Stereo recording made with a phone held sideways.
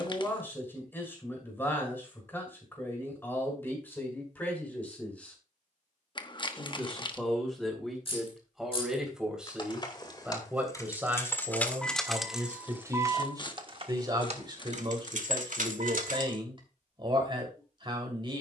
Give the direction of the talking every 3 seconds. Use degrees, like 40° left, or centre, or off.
20° left, 10° left, centre, 10° right, 30° right, 40° right.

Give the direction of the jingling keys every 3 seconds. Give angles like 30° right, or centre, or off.
off, off, 40° left, 20° left, 30° right, 70° right.